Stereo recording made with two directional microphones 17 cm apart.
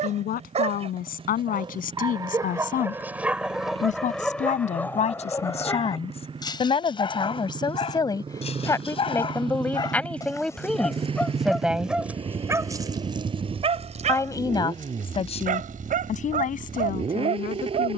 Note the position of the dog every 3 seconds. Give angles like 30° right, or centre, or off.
30° right, 10° left, 30° left, 10° left, 30° right, 50° right.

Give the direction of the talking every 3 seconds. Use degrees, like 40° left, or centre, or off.
60° left, 40° left, 30° left, centre, 20° left, 50° left.